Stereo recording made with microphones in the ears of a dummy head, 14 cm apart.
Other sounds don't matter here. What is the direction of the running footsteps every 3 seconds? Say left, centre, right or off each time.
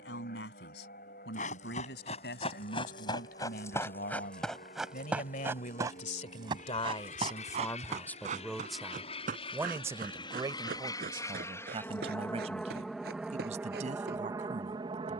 left, centre, right, right, right.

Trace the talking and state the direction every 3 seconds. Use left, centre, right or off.
left, left, left, right, right.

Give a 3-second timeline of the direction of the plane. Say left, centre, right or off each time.
left, left, left, left, centre.